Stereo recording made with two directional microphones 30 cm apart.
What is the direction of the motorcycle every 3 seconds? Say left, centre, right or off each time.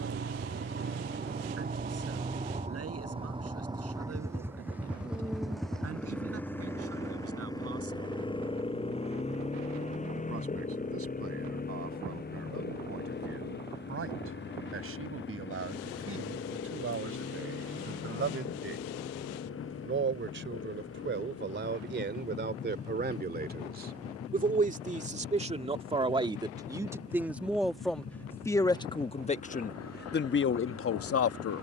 right, centre, centre, left, left, left, left, left, left, left, left.